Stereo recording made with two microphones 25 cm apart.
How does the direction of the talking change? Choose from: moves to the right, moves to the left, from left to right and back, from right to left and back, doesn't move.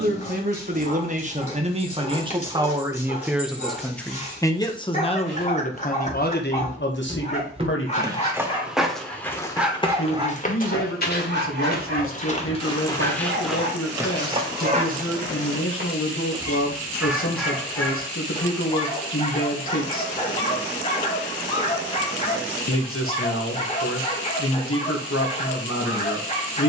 moves to the left.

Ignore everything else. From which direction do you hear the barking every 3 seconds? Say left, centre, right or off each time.
left, left, left, right, right, centre, left, left, left.